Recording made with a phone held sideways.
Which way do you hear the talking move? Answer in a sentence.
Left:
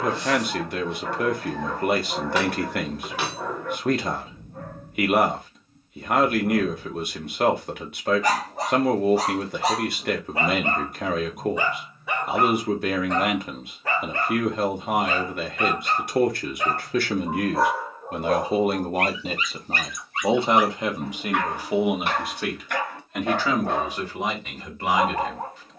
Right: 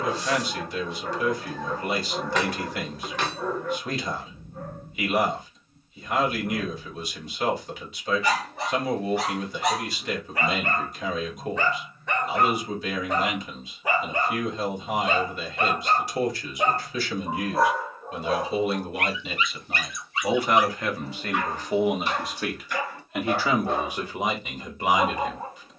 You can hear the talking move to the right.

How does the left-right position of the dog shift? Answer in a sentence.
You can hear the dog move from left to right and back again.